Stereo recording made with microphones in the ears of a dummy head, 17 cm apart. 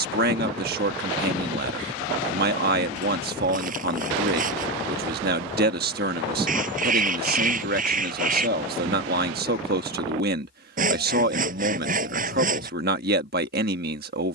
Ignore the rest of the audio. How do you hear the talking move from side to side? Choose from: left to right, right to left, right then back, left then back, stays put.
stays put.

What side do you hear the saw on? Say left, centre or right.
right.